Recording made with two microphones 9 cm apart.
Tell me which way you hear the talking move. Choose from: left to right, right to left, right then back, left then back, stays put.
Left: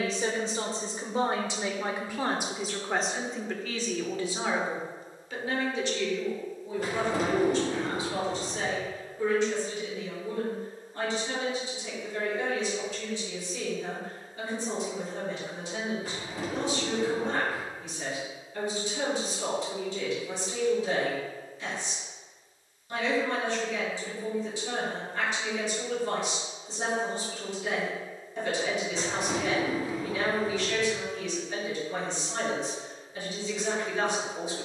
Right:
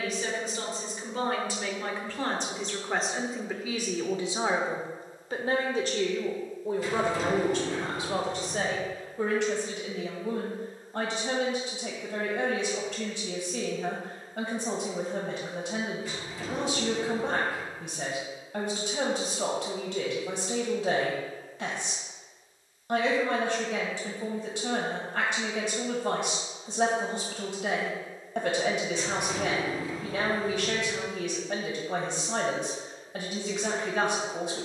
left to right.